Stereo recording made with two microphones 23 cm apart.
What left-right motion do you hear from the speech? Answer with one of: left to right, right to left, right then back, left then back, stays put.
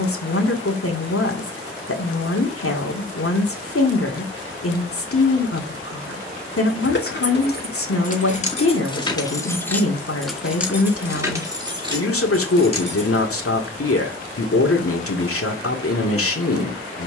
stays put.